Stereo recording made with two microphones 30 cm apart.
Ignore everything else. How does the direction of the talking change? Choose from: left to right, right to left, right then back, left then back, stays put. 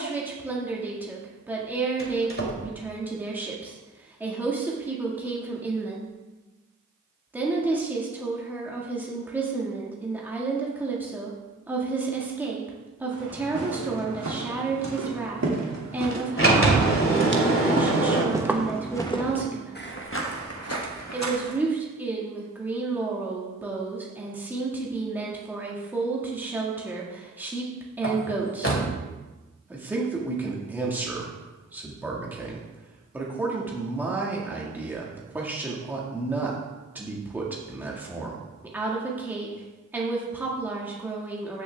stays put.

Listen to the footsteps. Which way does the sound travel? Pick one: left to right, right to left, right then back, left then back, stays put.
right to left.